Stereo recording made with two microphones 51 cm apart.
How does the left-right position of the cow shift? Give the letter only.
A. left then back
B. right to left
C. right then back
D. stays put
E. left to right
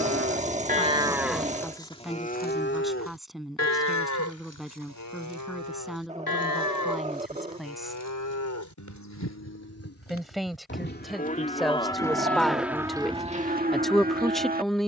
A.